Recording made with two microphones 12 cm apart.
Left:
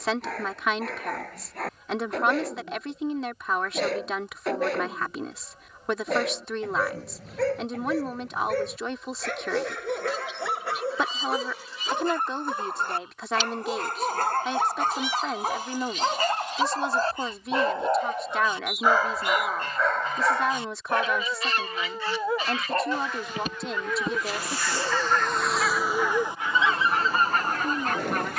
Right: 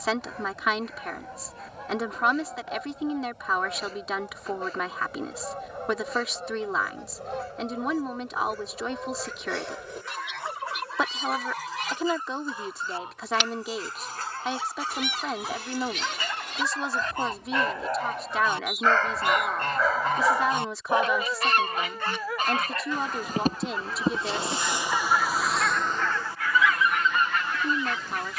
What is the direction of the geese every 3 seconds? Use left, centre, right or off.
right, right, right, right, right, right, right, right, centre, left.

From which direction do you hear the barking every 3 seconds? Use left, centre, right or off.
left, left, left, left, left, left, centre, left, left, left.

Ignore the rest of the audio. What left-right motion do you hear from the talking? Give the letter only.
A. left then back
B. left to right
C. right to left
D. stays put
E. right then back
D.